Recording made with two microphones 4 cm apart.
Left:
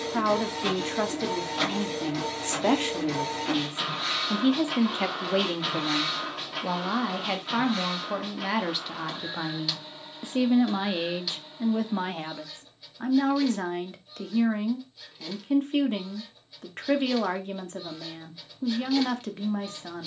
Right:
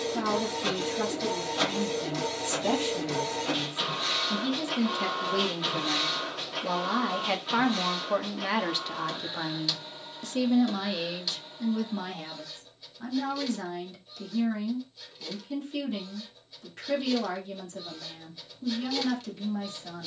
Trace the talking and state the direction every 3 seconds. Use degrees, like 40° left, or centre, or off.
60° left, 40° left, centre, 20° left, 50° left, 50° left, 50° left.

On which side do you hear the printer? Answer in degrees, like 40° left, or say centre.
10° left.